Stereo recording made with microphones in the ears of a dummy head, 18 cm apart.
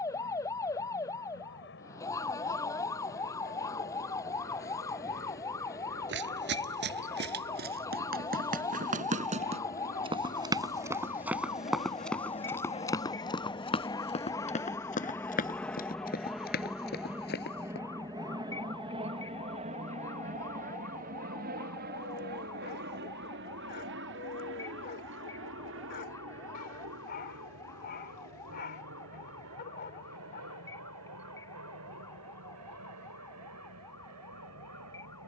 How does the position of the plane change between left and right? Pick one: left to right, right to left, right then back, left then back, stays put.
left to right.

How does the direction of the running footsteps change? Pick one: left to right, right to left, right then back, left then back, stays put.
right to left.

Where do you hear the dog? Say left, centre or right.
left.